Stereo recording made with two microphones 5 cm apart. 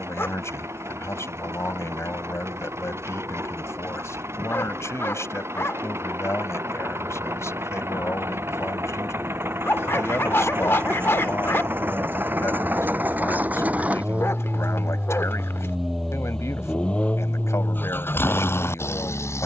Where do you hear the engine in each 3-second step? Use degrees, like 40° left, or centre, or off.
60° right, 60° right, 60° right, 50° right, 30° right, 10° left, 50° left.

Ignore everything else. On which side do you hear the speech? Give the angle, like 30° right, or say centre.
60° left.